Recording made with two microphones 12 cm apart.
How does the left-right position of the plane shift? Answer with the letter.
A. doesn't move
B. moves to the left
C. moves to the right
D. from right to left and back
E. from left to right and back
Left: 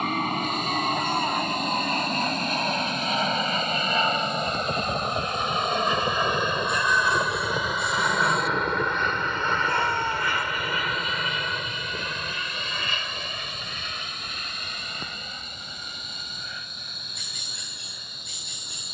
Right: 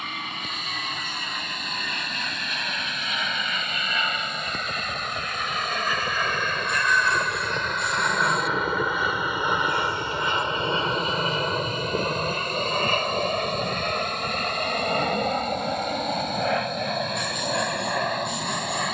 C.